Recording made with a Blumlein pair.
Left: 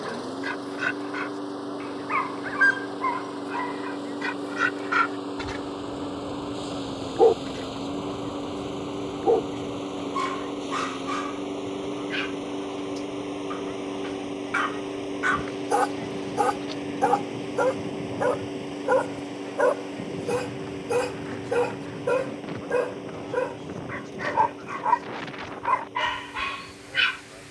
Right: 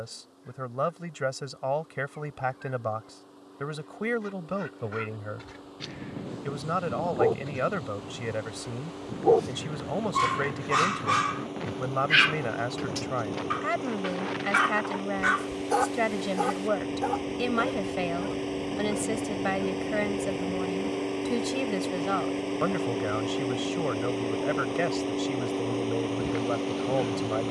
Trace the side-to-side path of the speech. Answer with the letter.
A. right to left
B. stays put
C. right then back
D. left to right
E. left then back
B.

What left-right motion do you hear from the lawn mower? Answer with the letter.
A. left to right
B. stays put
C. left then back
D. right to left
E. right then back
A.